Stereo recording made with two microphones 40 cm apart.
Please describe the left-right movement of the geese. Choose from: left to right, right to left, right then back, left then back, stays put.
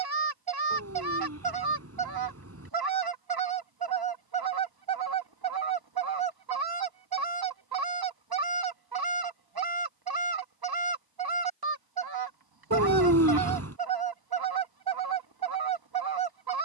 stays put.